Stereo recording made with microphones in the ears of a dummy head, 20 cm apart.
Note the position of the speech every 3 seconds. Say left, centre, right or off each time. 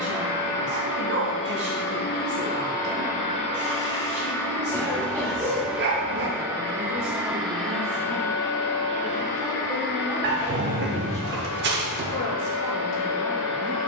right, right, right, centre, left.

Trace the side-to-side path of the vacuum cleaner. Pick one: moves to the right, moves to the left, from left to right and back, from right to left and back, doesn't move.
from left to right and back.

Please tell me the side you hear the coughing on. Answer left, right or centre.
centre.